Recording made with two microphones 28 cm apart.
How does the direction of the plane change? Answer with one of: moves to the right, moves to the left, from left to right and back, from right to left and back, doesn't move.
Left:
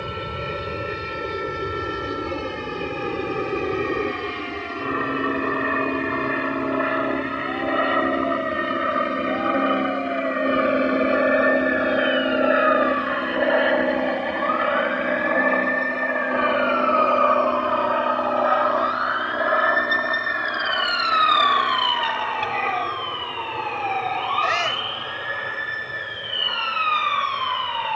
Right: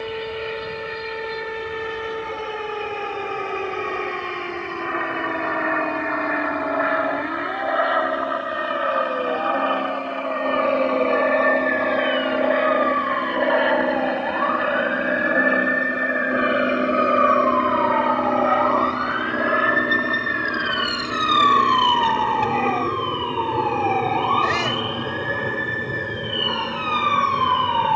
moves to the right.